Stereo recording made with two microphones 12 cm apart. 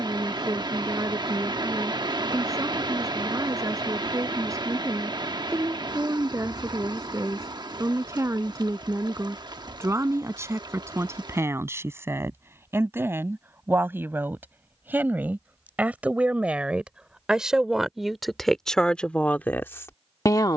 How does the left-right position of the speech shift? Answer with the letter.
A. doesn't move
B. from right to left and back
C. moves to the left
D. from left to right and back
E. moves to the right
C.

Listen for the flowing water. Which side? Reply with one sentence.
You can hear the flowing water on the right.